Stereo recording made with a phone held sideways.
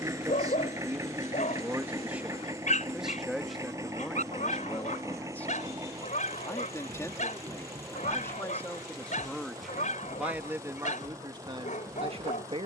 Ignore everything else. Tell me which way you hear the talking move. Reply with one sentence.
You can hear the talking move from right to left and back again.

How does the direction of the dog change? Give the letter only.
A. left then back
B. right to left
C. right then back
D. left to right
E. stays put
E.